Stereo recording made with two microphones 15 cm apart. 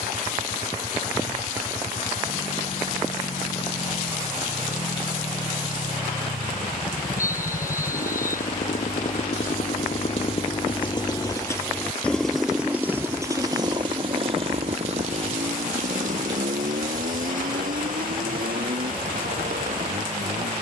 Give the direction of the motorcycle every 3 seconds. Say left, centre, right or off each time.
left, left, left, left, right, right, right.